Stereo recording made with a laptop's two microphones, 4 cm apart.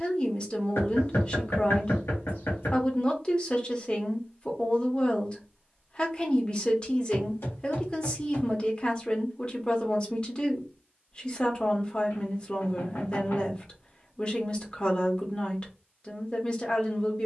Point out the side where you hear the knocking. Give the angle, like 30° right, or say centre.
70° left.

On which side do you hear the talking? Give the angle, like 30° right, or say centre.
30° left.